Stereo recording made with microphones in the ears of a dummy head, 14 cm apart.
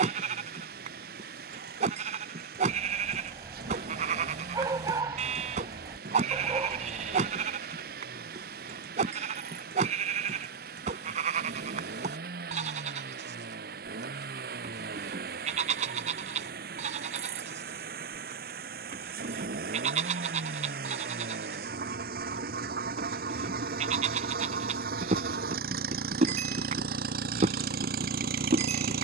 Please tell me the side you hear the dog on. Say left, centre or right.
right.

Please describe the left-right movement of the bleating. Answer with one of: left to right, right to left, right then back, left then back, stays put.
stays put.